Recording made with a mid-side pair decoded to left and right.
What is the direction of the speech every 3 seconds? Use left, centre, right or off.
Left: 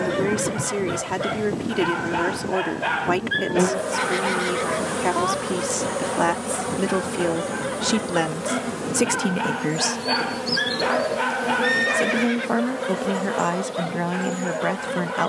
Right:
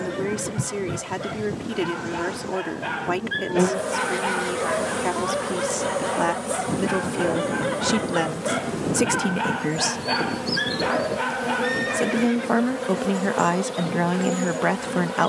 left, left, left, centre, right.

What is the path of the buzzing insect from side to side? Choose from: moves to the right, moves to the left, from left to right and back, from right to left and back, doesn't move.
from right to left and back.